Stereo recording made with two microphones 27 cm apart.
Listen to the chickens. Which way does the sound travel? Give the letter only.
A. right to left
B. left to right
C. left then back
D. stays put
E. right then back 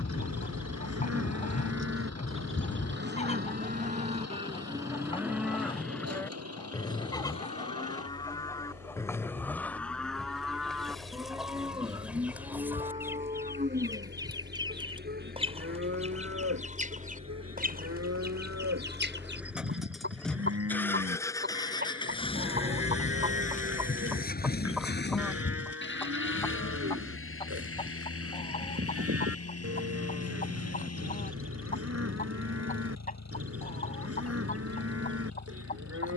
E.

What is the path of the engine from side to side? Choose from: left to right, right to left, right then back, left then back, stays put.
right to left.